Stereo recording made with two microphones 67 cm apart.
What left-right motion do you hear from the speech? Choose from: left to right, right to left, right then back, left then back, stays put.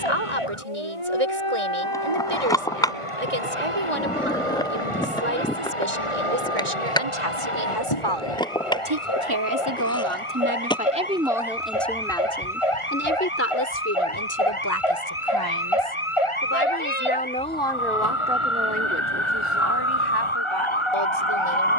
left then back.